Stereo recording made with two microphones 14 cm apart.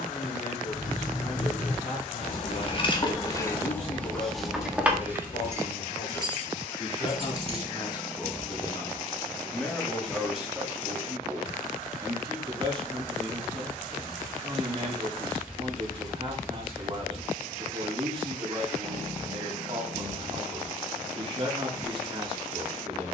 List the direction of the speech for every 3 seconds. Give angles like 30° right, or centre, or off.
50° left, 50° left, 30° left, 10° right, 30° right, 30° right, 30° right, 30° right.